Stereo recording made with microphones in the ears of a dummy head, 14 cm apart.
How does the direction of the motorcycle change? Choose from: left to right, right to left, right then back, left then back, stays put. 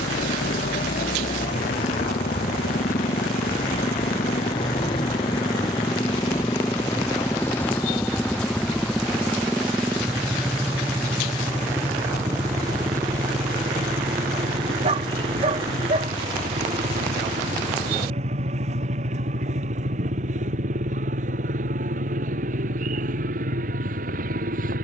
left to right.